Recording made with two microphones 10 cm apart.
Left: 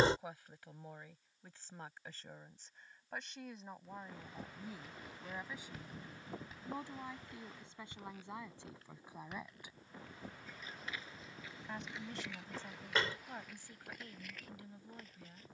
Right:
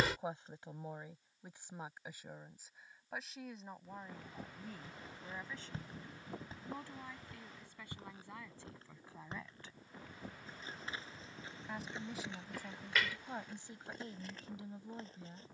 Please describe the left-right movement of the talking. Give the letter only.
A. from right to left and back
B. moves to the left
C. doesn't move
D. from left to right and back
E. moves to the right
A.